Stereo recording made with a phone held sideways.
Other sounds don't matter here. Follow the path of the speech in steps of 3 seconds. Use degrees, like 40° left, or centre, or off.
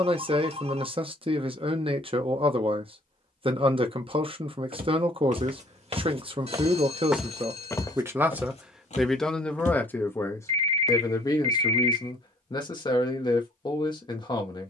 40° right, 40° right, 30° right, 20° left, 30° left.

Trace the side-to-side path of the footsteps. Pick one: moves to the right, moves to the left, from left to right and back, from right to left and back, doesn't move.
moves to the left.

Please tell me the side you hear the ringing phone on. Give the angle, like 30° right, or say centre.
50° right.